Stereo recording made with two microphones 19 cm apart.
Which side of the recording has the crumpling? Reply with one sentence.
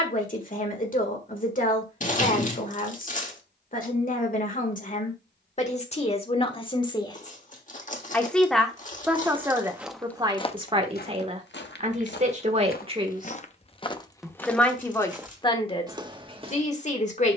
You can hear the crumpling on the left.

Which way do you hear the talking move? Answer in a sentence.
You can hear the talking move from left to right and back again.